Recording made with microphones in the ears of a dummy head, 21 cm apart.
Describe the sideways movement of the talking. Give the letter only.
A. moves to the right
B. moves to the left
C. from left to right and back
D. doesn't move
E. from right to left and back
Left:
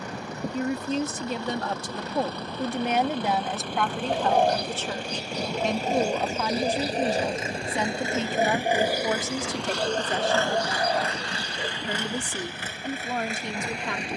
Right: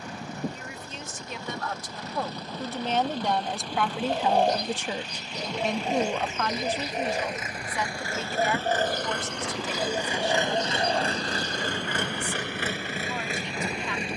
C.